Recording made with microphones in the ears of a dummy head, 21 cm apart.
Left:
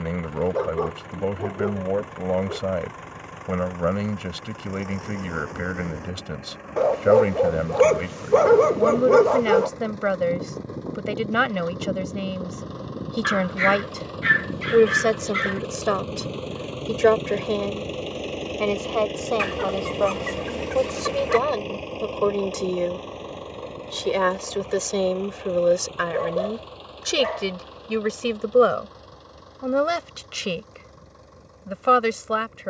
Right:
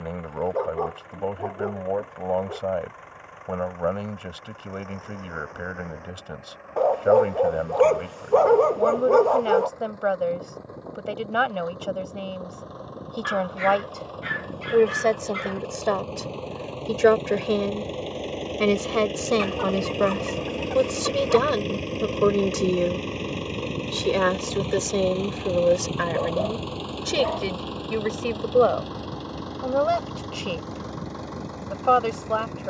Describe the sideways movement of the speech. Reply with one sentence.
You can hear the speech go right and come back.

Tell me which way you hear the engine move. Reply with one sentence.
You can hear the engine move to the right.